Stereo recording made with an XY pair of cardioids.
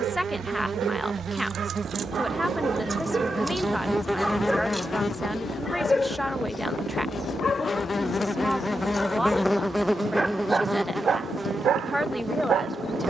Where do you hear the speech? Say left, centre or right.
centre.